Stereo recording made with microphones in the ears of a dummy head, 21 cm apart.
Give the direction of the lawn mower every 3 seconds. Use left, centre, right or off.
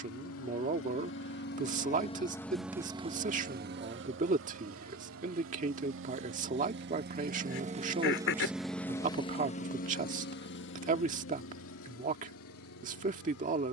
left, right, right, left, left.